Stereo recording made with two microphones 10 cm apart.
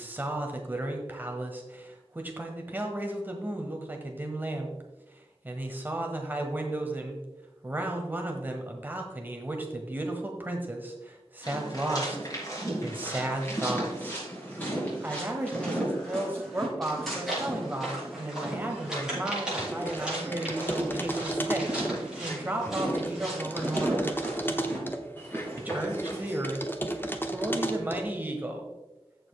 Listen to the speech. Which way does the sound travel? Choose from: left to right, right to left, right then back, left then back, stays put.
stays put.